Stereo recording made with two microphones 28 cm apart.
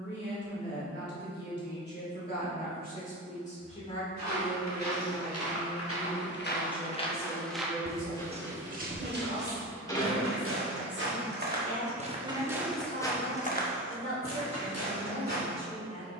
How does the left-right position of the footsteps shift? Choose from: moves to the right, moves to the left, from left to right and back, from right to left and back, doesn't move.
from left to right and back.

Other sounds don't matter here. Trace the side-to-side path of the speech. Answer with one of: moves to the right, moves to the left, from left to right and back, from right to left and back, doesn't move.
moves to the right.